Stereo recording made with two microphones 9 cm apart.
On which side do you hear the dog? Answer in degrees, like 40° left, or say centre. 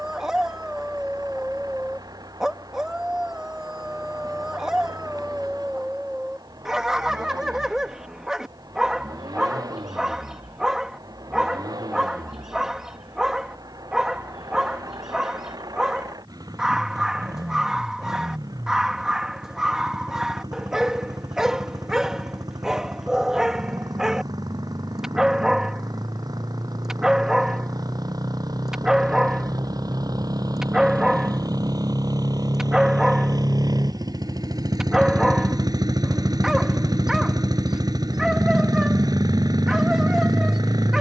10° right.